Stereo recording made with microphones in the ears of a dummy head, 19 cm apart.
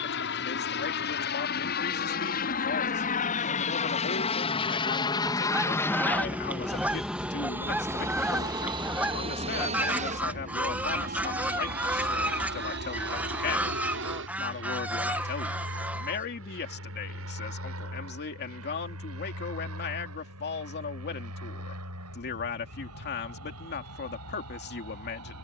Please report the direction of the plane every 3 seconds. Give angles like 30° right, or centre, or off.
50° left, 30° left, 10° right, 30° right, 50° right, 60° right, 60° right, 70° right, 70° right.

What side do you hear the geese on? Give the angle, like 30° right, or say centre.
10° right.